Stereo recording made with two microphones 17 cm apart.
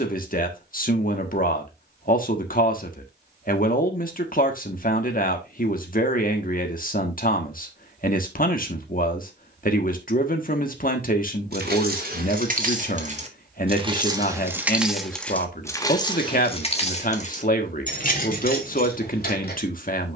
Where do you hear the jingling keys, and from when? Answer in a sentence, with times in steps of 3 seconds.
You can hear the jingling keys not at all from 0 s, on the right from 9 s and on the left from 15 s.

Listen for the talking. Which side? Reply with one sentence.
In this clip you hear the talking on the left.